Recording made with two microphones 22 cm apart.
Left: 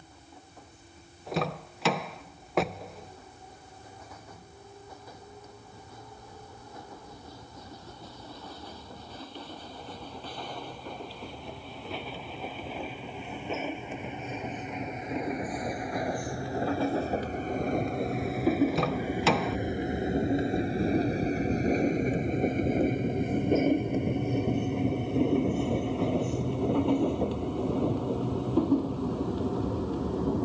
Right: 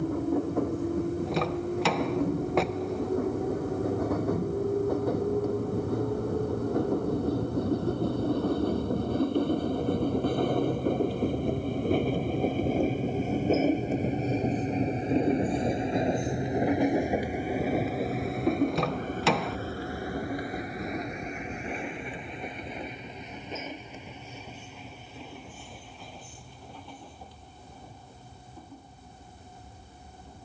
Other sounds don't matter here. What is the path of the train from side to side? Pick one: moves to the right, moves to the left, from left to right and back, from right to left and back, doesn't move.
moves to the left.